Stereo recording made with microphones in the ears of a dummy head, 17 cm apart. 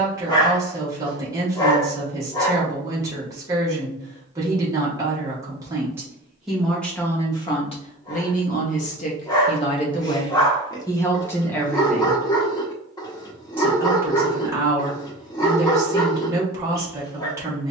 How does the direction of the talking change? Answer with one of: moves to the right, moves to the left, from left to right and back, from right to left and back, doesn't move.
from right to left and back.